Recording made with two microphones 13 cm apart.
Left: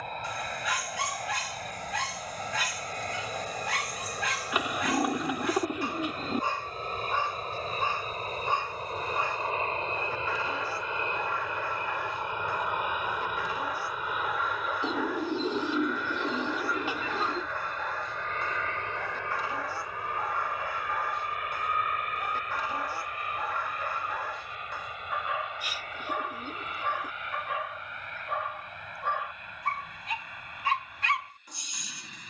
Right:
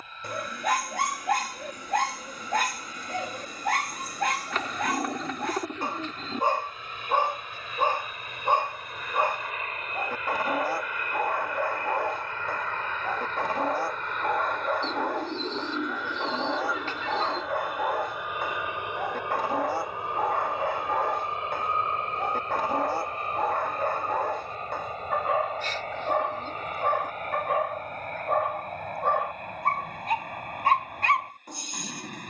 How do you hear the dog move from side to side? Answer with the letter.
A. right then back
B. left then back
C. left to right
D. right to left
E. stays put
E.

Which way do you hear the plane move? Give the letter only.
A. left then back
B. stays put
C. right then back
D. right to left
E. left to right
E.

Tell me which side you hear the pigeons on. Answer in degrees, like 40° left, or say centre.
10° left.